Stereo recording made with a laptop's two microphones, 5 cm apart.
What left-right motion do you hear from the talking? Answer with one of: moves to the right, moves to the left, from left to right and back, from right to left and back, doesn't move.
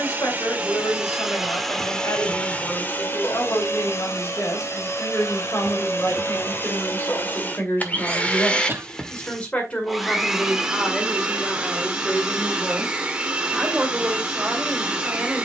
moves to the right.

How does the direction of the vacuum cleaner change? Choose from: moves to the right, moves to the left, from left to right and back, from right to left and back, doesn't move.
from right to left and back.